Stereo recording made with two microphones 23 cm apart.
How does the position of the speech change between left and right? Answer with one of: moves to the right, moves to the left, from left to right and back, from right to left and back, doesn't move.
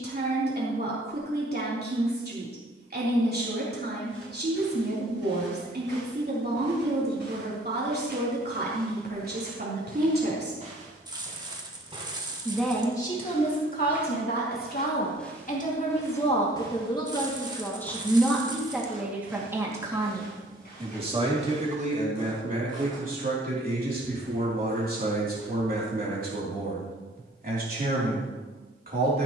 from right to left and back.